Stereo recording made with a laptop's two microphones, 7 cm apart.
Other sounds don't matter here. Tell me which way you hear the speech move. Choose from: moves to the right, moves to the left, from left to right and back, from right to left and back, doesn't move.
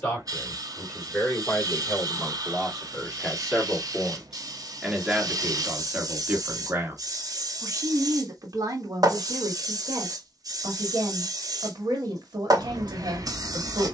moves to the right.